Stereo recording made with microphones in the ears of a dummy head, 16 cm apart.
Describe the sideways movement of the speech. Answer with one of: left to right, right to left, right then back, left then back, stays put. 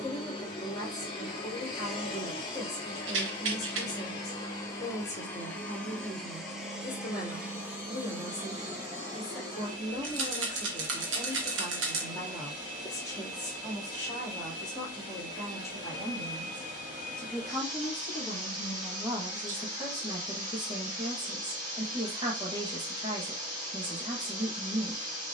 left to right.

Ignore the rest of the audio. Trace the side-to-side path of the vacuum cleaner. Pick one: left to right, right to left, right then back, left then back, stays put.
left to right.